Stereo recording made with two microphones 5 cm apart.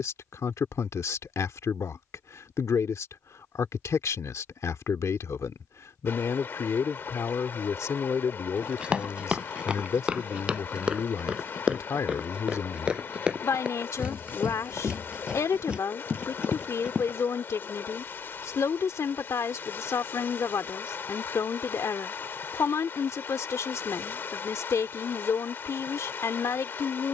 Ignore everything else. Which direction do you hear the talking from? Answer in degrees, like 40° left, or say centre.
70° left.